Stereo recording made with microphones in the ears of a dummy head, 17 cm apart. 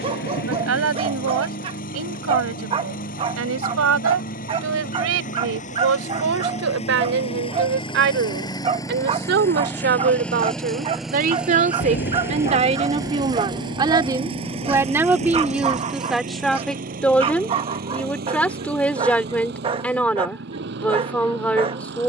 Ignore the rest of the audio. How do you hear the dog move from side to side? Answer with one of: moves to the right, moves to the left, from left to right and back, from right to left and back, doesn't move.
doesn't move.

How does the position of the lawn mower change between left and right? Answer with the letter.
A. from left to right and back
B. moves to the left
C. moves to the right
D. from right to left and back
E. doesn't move
C.